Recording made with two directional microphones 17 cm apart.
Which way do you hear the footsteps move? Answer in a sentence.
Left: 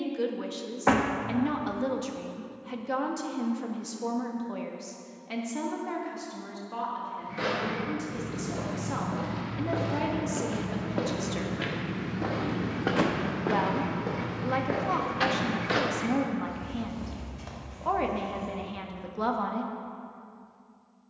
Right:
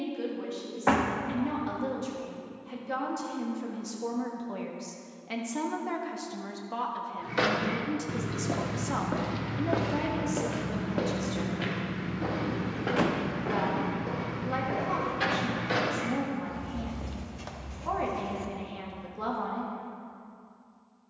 In this clip you hear the footsteps go left and come back.